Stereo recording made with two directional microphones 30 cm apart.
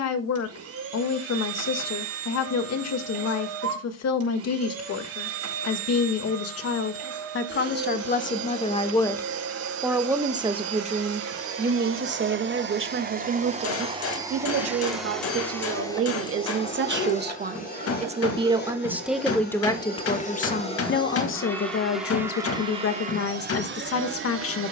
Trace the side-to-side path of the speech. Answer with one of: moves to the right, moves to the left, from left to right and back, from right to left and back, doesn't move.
from left to right and back.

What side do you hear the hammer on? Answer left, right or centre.
left.